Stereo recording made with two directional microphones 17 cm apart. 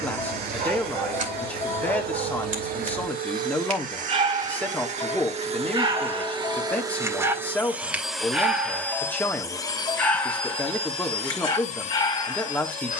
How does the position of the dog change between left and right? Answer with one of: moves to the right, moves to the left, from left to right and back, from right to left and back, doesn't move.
moves to the left.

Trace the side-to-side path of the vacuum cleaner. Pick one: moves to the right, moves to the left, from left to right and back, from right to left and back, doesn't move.
moves to the left.